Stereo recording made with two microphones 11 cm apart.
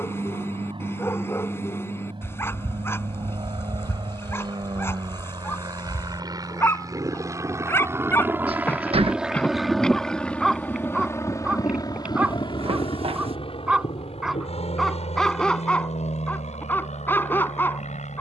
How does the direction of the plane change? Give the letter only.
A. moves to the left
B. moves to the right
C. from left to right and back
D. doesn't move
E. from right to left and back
A.